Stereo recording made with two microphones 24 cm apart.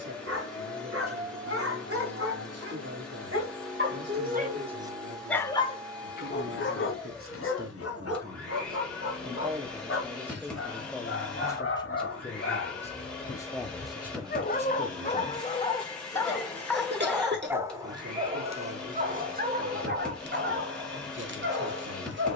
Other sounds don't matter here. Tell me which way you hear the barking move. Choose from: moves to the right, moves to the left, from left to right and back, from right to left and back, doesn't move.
from right to left and back.